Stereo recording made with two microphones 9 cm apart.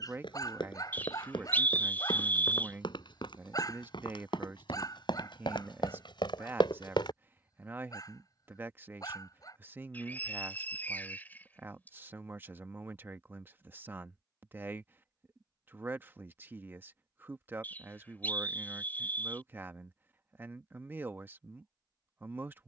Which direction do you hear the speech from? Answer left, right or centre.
right.